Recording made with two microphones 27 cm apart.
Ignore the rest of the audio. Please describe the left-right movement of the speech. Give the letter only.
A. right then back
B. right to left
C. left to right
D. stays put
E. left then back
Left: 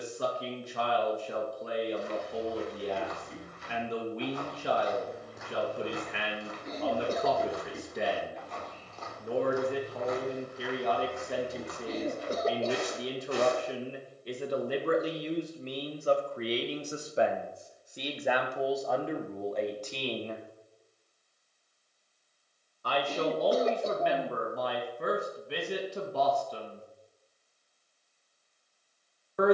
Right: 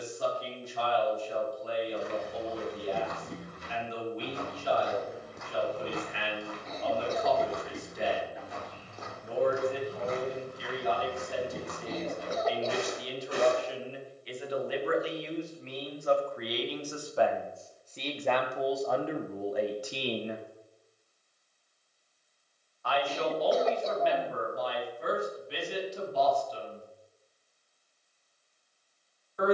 A.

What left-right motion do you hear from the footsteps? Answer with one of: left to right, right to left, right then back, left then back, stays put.
left then back.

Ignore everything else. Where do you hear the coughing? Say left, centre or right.
left.